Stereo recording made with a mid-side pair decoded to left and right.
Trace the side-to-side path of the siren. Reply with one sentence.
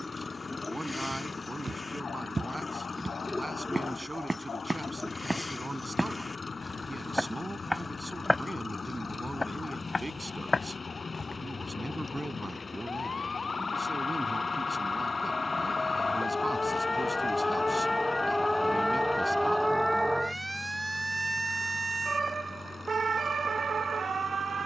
You can hear the siren travel towards the right.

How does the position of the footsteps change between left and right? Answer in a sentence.
You can hear the footsteps move to the left.